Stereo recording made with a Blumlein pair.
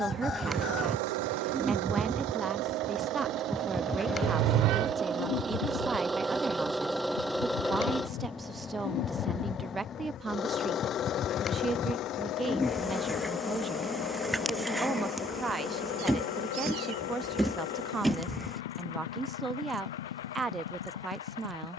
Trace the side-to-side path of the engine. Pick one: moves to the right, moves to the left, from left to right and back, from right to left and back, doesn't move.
moves to the left.